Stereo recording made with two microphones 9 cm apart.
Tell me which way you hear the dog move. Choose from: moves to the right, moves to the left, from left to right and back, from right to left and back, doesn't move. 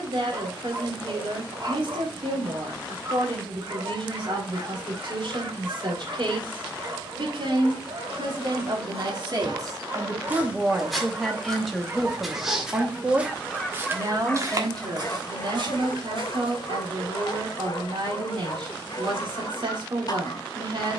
moves to the left.